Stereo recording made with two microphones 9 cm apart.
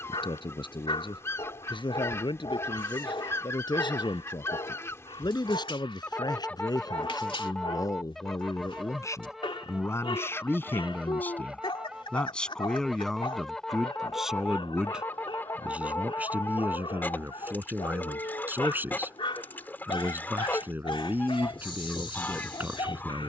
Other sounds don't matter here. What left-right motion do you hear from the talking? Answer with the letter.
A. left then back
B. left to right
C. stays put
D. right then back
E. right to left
B.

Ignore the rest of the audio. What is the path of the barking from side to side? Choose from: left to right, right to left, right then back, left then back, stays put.
stays put.